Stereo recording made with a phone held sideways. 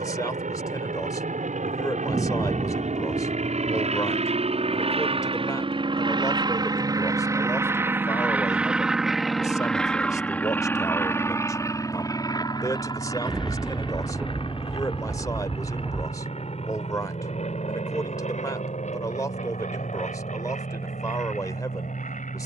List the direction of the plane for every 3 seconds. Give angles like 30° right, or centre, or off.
60° right, 50° right, 20° right, 10° left, 30° left, 40° left, 50° left, 50° left.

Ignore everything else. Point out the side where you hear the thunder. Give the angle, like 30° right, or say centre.
centre.